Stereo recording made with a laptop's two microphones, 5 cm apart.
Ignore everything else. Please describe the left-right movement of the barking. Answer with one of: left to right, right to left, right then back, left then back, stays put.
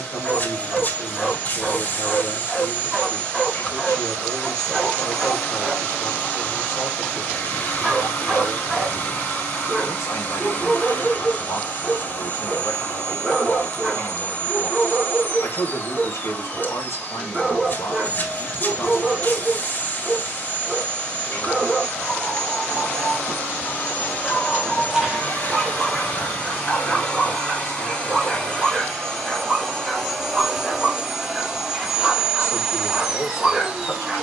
stays put.